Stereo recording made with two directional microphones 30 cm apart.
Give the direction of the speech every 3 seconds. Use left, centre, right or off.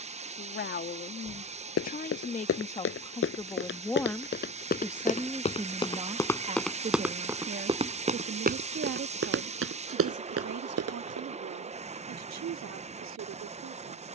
left, centre, right, right, right.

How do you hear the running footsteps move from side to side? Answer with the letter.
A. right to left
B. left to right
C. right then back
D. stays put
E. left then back
B.